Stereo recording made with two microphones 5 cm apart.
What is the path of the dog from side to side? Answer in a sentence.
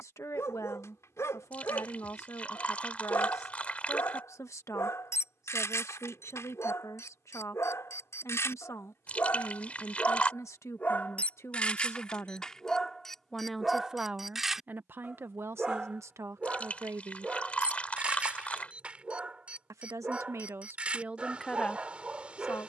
In this clip you hear the dog move to the right.